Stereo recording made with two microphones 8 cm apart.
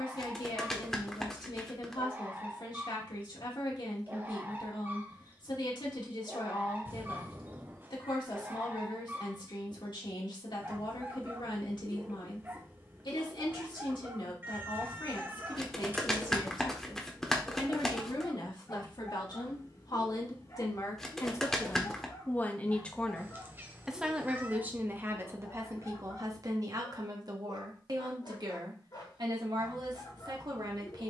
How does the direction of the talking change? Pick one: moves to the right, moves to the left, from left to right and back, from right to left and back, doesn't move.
moves to the right.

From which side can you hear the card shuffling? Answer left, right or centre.
centre.